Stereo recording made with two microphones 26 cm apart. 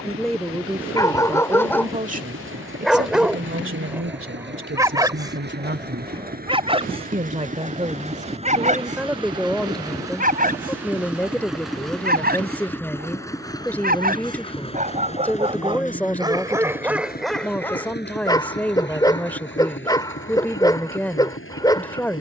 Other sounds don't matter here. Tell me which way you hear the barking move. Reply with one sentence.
In this clip you hear the barking move from left to right and back again.